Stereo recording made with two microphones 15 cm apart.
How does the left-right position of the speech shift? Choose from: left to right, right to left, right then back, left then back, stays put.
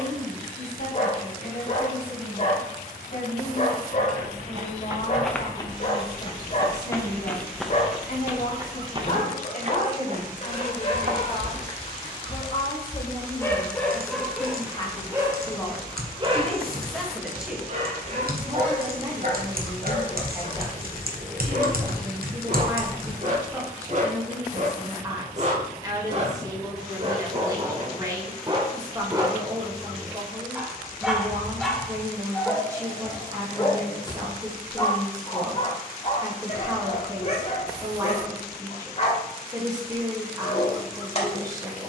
left to right.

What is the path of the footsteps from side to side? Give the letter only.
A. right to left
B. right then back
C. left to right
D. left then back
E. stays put
D.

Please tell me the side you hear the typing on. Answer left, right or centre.
right.